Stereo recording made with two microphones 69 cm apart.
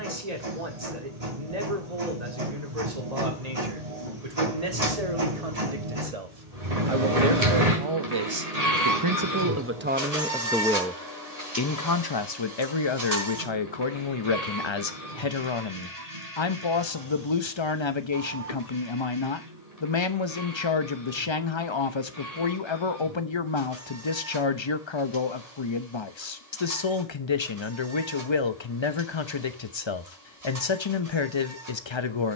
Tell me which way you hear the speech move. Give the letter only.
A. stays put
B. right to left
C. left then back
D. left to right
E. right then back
B.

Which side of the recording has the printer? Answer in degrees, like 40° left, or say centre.
60° right.